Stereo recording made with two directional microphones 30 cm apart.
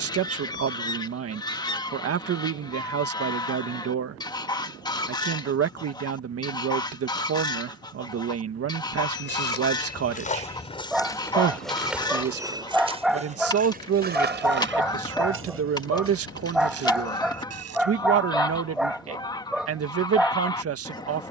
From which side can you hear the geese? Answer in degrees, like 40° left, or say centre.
10° left.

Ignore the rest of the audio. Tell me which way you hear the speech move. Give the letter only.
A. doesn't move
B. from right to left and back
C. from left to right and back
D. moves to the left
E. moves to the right
A.